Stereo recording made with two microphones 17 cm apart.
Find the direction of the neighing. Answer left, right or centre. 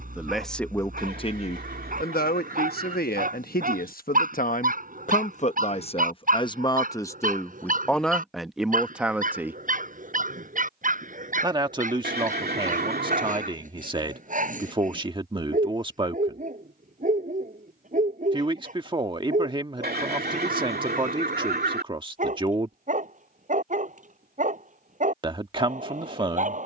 right.